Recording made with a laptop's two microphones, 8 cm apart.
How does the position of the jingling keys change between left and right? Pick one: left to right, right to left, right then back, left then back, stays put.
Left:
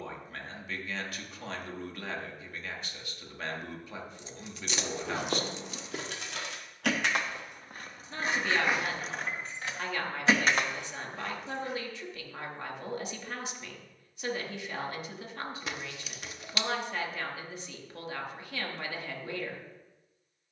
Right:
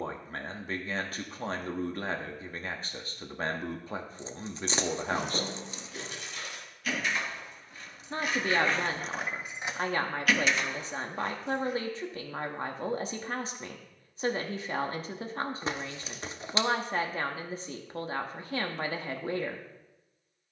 right then back.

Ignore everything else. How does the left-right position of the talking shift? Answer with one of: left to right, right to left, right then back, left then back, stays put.
stays put.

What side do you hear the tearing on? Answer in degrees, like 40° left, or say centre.
30° right.